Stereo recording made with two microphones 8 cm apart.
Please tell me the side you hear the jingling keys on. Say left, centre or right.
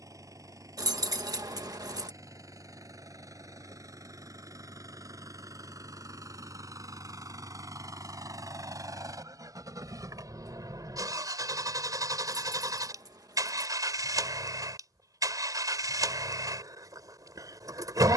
right.